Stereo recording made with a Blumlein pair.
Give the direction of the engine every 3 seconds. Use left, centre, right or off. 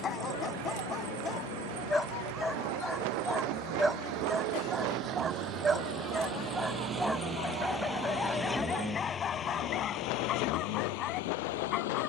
right, right, centre, left.